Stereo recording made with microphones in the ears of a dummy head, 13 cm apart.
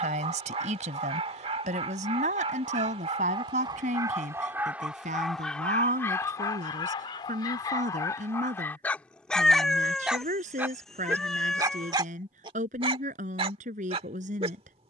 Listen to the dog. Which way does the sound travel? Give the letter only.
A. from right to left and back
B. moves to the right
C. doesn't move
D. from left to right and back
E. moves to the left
A.